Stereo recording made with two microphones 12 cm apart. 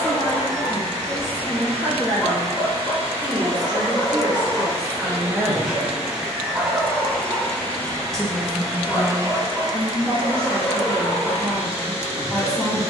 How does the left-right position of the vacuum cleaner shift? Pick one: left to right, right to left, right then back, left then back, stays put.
left then back.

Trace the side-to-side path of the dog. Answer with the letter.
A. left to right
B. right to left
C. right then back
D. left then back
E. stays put
C.